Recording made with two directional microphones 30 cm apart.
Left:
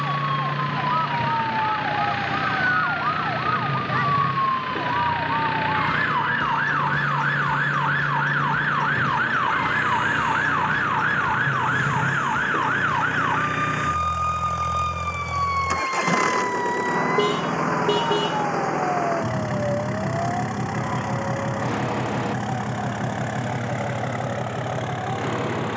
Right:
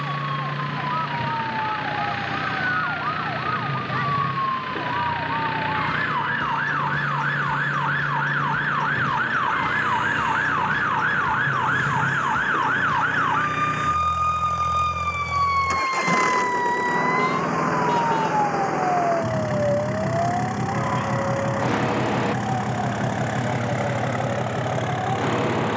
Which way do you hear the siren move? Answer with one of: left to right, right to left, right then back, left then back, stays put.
left to right.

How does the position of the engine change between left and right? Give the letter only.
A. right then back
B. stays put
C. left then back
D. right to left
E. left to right
E.